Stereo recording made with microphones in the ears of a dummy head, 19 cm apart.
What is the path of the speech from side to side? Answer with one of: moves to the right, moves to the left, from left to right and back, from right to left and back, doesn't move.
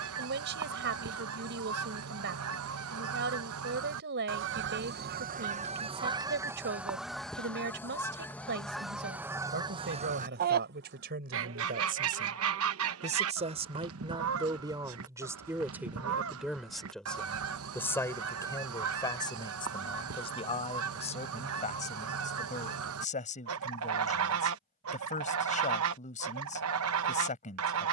moves to the left.